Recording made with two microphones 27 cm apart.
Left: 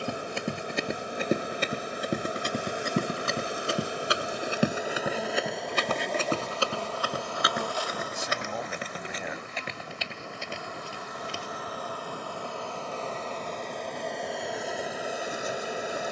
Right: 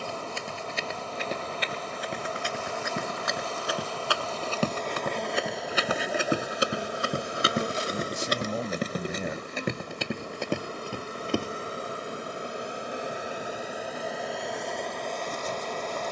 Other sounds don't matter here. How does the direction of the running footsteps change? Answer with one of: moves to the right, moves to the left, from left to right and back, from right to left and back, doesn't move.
moves to the right.